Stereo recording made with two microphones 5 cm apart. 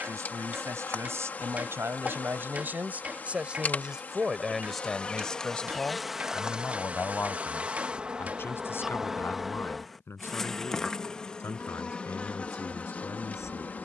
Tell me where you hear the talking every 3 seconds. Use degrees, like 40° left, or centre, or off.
50° right, centre, 40° left, 50° left, 60° left.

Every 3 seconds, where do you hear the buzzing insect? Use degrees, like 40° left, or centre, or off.
30° left, 30° left, 20° right, 10° left, 30° left.